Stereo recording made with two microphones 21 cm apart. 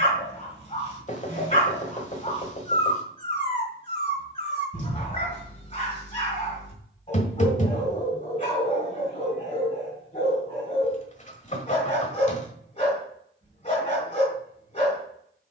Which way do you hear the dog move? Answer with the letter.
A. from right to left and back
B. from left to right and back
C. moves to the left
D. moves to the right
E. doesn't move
E.